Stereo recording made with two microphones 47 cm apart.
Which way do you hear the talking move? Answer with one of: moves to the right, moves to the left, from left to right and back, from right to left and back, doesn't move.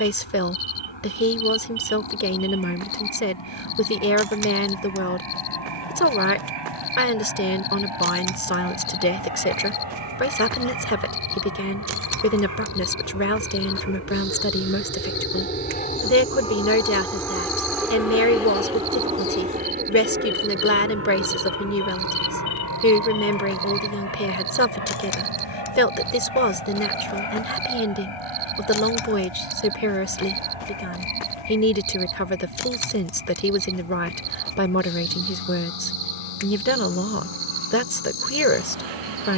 doesn't move.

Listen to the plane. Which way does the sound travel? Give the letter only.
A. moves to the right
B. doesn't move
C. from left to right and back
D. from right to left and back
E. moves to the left
A.